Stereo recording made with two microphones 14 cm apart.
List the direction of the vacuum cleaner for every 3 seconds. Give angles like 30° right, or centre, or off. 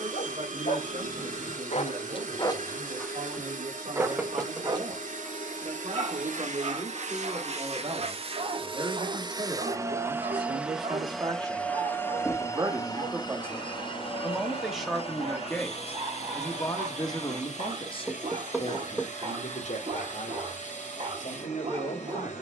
70° right, 70° right, 50° right, 10° right, 30° left, 50° left, 60° left, 60° left.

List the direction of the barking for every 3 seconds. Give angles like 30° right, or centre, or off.
50° left, 30° right, 50° right, 50° right, 50° right, 50° right, 50° right, 50° right.